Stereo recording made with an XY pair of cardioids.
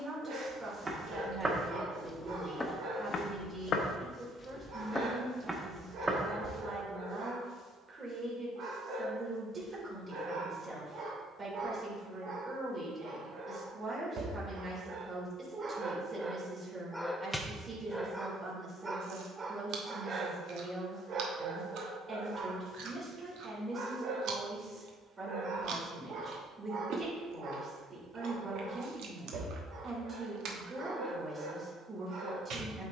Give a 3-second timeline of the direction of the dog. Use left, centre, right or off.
right, right, right, right, right, centre, right, right, right, right, right.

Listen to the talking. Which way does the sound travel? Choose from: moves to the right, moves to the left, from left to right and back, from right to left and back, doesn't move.
doesn't move.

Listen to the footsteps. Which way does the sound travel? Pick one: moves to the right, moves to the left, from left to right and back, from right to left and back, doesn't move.
from right to left and back.